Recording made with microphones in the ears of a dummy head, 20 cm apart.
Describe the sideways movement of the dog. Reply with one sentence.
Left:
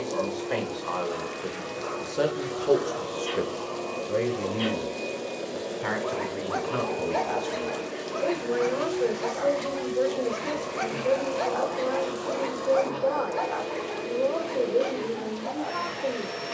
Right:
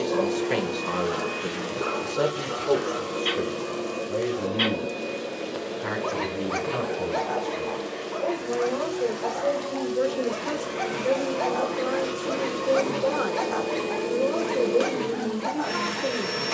You can hear the dog move from right to left and back again.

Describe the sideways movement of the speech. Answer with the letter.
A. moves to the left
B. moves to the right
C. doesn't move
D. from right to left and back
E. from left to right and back
D.